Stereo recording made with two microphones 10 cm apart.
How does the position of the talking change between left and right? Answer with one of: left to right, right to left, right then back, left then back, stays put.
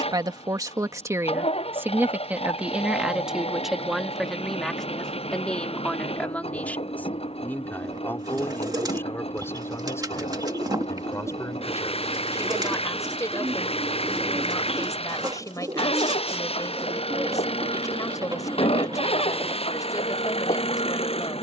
right to left.